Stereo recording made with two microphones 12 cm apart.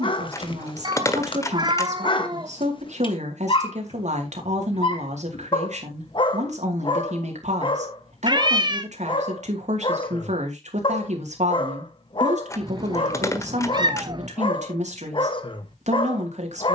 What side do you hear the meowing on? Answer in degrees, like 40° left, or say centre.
40° right.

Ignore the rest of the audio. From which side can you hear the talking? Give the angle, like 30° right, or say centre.
70° right.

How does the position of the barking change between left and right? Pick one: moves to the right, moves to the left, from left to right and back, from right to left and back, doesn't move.
doesn't move.